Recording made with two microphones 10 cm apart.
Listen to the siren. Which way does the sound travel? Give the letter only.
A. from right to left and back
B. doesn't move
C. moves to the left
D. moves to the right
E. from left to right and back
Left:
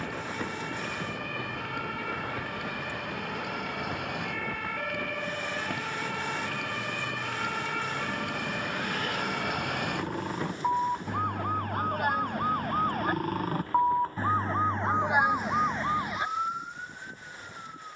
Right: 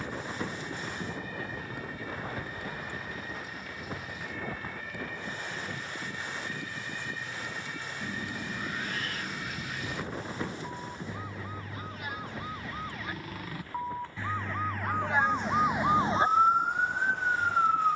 D.